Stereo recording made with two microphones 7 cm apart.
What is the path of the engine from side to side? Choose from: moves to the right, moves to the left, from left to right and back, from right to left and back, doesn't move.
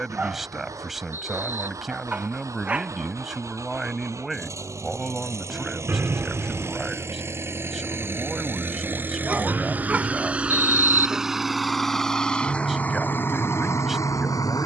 moves to the left.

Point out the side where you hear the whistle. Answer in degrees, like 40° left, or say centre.
30° right.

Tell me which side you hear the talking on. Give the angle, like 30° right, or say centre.
centre.